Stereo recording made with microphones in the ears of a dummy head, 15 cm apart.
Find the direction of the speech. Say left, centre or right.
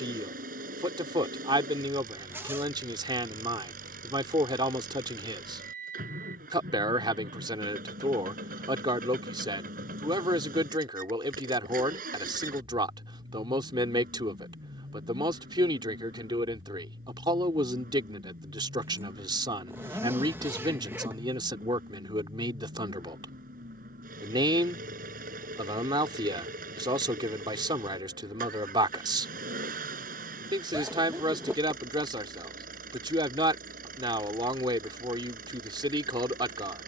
right.